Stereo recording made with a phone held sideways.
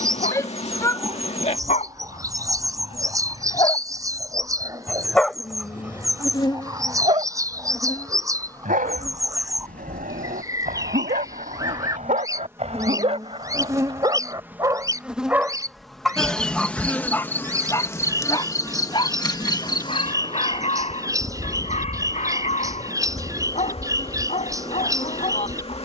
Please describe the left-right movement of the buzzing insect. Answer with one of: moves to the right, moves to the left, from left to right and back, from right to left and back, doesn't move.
from left to right and back.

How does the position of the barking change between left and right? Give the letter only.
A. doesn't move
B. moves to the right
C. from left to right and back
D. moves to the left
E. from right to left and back
C.